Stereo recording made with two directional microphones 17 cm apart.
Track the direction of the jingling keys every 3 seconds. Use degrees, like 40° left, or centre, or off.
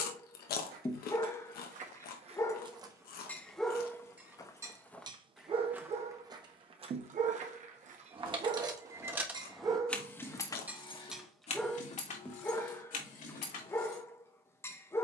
off, off, 30° right, 20° left, 50° left.